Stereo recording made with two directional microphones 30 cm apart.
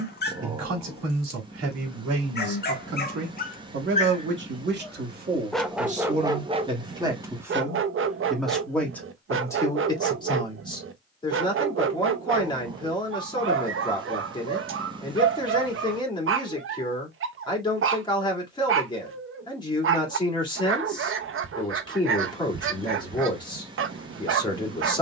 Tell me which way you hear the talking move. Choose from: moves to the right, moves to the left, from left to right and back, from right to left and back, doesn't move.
moves to the left.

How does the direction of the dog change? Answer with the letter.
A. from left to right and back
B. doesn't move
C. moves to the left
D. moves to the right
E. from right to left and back
D.